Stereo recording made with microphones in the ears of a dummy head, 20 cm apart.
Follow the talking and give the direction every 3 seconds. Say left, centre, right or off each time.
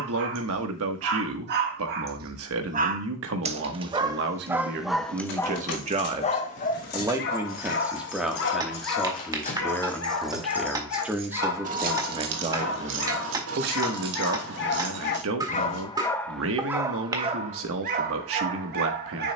right, right, centre, centre, right, right, right.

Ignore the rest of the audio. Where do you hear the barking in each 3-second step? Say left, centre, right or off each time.
right, centre, left, left, left, centre, right.